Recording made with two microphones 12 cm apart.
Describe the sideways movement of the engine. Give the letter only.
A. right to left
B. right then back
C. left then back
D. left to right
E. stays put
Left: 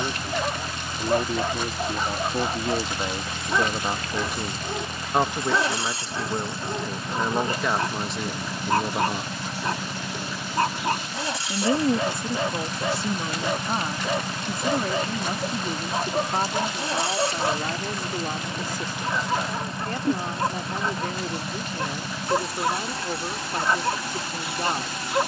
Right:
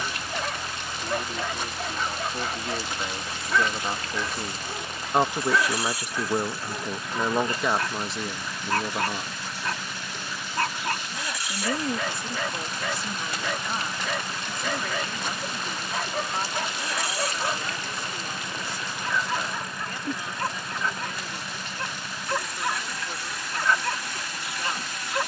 E.